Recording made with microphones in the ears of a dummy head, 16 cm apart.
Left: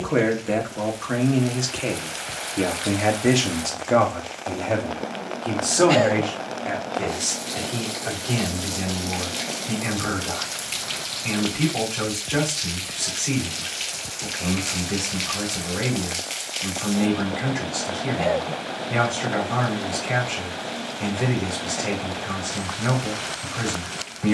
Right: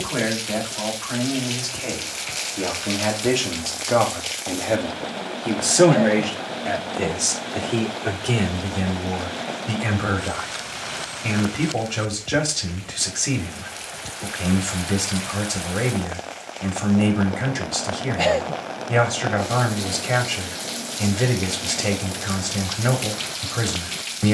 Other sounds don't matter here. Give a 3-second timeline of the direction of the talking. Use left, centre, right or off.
left, centre, right, right, right, right, right, right.